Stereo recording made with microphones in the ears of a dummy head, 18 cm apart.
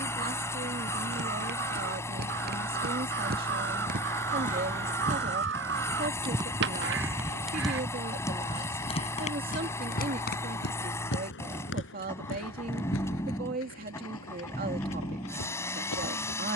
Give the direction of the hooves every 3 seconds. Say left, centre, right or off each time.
right, right, centre, left, left, left.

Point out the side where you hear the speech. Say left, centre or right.
right.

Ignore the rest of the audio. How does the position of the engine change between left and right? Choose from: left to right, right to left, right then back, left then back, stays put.
stays put.